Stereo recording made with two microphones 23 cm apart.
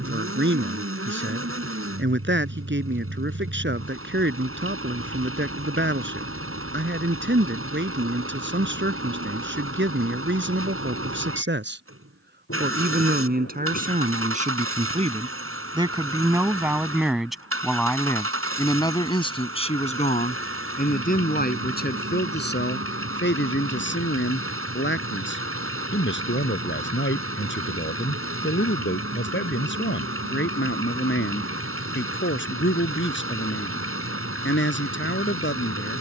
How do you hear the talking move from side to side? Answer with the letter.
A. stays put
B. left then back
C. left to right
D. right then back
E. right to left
E.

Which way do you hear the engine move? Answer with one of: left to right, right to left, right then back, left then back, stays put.
stays put.